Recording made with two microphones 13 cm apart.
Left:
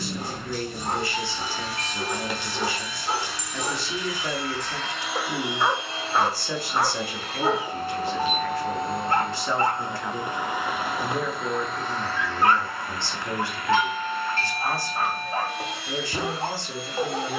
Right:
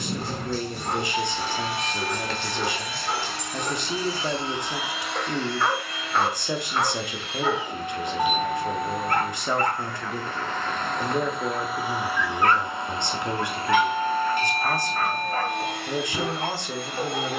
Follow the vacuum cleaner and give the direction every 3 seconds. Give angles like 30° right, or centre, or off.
60° right, 20° right, 40° left, 10° left, 30° right, 60° right.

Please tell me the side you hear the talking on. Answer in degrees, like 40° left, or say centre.
20° right.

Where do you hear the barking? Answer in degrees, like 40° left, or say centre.
10° left.